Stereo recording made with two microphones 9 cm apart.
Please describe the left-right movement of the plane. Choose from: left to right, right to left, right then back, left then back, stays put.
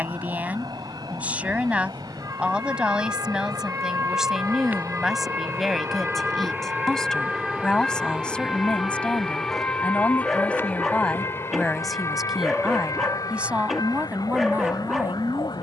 right to left.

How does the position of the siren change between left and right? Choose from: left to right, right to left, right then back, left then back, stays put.
right to left.